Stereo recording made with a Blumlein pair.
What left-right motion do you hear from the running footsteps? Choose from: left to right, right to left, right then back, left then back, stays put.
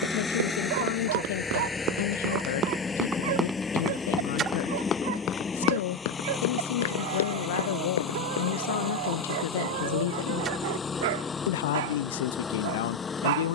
right to left.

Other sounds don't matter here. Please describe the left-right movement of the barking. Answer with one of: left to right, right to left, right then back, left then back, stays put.
stays put.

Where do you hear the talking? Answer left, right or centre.
left.